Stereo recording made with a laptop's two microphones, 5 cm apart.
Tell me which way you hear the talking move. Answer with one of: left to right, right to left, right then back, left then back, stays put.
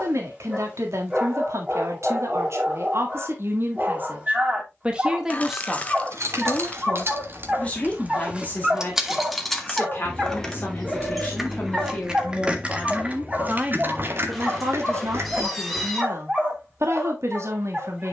left then back.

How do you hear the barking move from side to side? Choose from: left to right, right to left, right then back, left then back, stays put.
stays put.